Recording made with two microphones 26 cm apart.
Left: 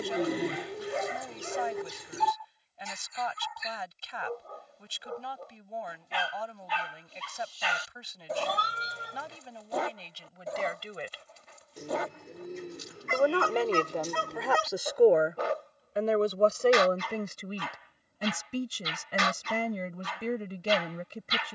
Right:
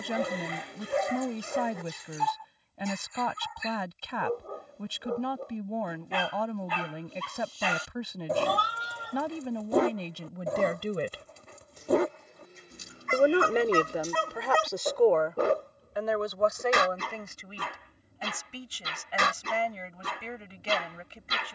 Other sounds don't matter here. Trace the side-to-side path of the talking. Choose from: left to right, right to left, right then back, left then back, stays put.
right to left.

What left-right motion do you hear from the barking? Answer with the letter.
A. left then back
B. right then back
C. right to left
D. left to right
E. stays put
E.